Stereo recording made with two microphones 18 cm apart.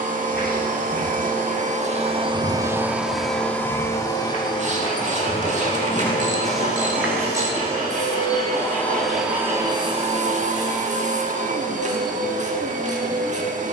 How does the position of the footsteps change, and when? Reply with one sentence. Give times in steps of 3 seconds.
In this clip you hear the footsteps on the left from 0 s, in the centre from 6 s and not at all from 9 s.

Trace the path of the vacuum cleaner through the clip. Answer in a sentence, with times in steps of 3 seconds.
In this clip you hear the vacuum cleaner on the right from 0 s, on the left from 3 s and on the right from 9 s.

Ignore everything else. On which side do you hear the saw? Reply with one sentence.
You can hear the saw on the right.